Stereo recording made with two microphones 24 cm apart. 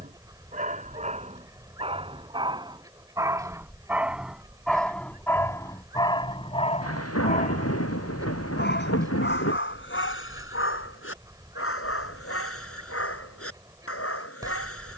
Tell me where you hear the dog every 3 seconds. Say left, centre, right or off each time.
right, centre, left, left, left.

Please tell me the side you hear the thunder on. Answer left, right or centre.
left.